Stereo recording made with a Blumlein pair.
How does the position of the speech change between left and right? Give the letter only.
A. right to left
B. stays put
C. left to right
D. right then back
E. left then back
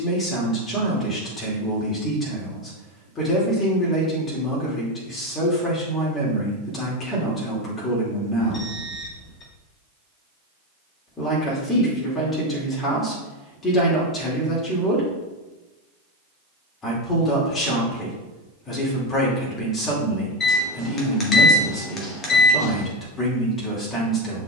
B.